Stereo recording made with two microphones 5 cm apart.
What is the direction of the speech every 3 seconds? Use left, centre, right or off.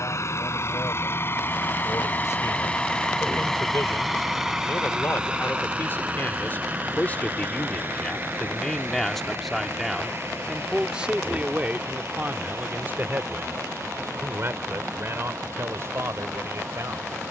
left, left, left, centre, right, right.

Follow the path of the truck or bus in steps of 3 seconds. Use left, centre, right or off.
left, centre, right, right, right, right.